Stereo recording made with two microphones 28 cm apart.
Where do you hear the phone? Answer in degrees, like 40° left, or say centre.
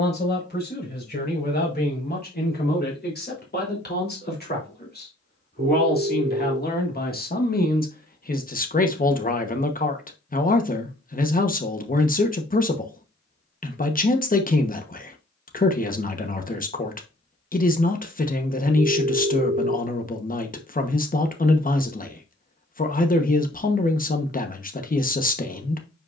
50° right.